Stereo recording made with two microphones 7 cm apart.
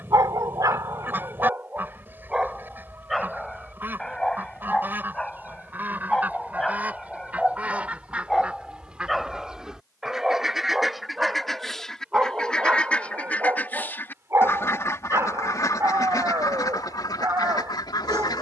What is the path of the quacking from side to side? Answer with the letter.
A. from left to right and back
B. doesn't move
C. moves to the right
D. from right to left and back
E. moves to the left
E.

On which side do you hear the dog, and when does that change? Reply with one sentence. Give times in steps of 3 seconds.
You can hear the dog on the right from 0 s, in the centre from 3 s and on the right from 12 s.